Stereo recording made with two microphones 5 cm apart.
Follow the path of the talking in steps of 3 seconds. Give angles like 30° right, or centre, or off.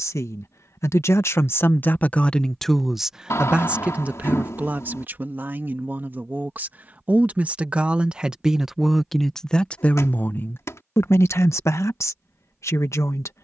40° left, 30° right, 30° right, 40° left, 70° left.